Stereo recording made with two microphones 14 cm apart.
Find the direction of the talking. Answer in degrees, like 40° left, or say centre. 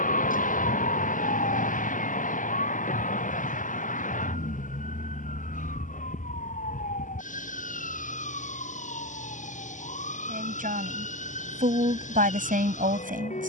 80° right.